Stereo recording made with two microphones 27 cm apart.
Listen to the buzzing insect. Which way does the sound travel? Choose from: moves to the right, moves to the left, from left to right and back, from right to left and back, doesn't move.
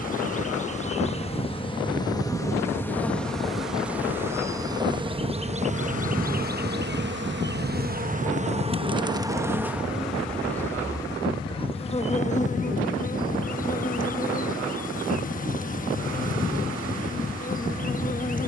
from left to right and back.